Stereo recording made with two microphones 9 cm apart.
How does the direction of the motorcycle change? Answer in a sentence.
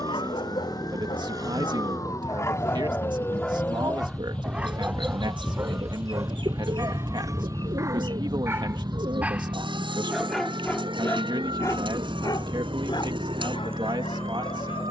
You can hear the motorcycle stay in one place.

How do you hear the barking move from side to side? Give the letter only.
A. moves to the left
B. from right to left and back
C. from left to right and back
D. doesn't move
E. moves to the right
C.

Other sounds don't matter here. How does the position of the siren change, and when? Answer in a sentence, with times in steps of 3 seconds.
You can hear the siren on the left from 0 s, in the centre from 3 s and on the right from 6 s.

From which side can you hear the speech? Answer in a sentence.
You can hear the speech on the right.